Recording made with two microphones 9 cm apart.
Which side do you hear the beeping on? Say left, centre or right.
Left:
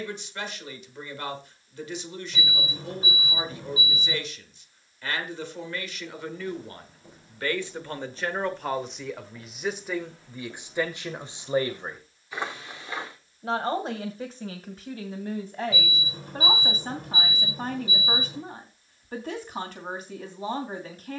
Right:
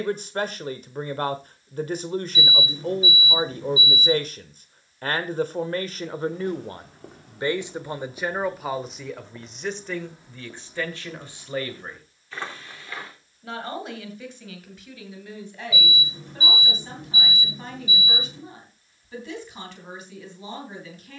left.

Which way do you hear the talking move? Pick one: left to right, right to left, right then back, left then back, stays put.
right to left.